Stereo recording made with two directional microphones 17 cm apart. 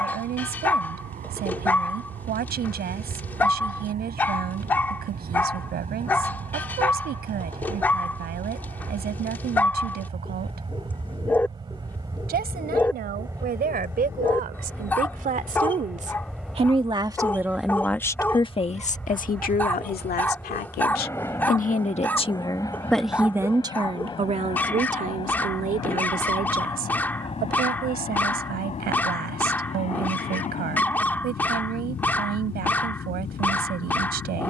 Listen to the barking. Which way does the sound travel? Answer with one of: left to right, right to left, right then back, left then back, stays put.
stays put.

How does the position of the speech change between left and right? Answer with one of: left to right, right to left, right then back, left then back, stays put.
left then back.